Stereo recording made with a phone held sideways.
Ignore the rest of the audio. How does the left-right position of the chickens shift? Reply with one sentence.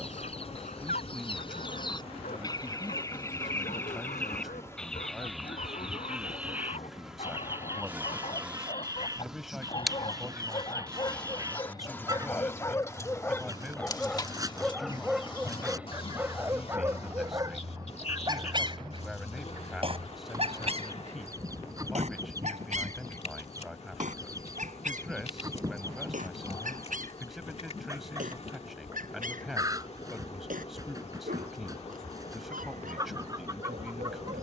You can hear the chickens move to the right.